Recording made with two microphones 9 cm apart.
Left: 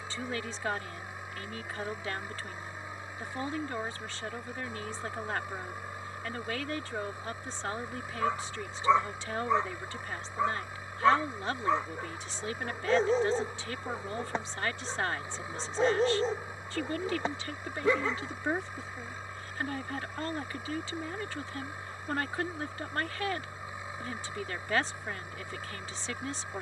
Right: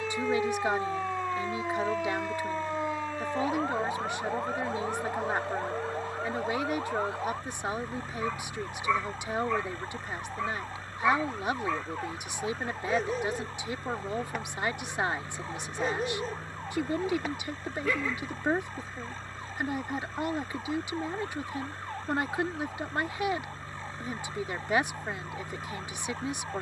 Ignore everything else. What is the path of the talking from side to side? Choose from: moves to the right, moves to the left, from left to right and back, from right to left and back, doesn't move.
doesn't move.